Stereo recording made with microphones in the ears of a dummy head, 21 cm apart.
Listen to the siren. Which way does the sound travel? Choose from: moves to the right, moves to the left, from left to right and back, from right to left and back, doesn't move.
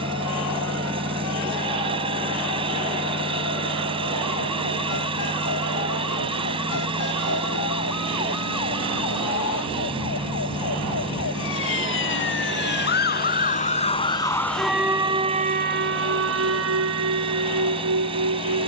moves to the right.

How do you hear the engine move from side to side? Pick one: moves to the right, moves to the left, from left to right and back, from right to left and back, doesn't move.
doesn't move.